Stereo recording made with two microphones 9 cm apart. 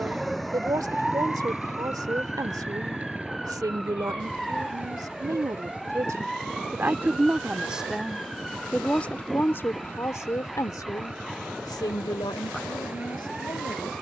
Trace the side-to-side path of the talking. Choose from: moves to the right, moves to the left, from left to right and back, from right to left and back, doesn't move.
moves to the left.